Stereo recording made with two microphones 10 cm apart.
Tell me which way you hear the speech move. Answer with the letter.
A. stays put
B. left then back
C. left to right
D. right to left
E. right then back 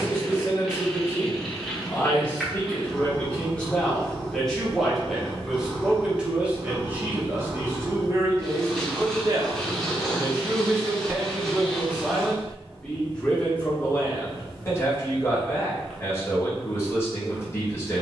E.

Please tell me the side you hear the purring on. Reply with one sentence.
You can hear the purring in the centre.